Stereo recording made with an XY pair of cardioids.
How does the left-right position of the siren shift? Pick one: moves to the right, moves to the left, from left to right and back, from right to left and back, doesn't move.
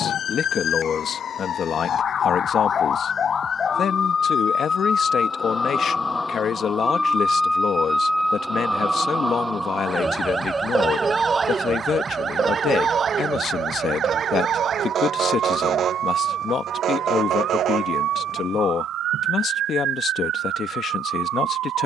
moves to the right.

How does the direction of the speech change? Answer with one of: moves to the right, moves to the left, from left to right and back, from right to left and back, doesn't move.
doesn't move.